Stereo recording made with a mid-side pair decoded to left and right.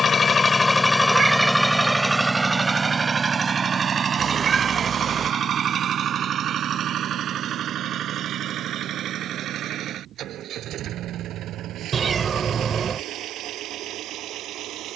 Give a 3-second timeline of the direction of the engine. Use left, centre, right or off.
centre, right, right, right, right.